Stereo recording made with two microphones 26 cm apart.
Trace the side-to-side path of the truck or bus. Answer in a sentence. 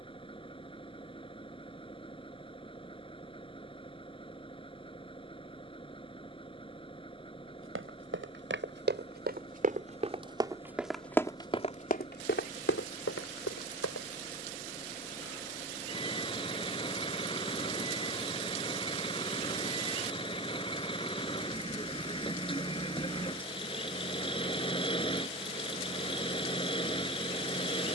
In this clip you hear the truck or bus stay put.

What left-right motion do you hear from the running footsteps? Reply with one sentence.
In this clip you hear the running footsteps travel towards the left.